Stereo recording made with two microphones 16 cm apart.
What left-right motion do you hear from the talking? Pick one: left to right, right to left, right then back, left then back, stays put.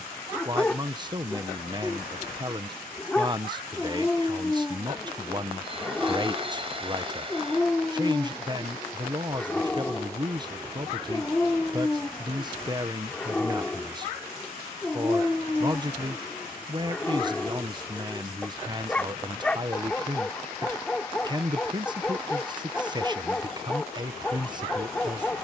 stays put.